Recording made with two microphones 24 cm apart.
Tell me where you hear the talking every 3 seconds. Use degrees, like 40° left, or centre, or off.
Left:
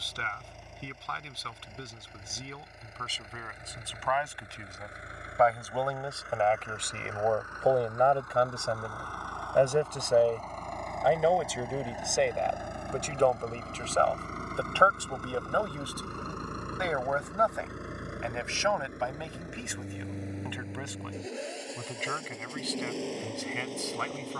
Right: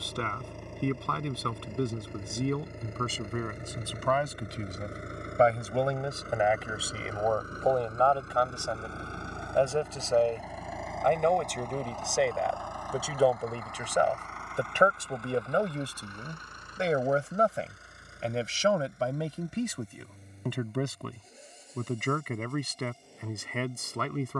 60° right, 40° right, 10° left, 10° left, 10° right, 30° right, 40° right, 50° right.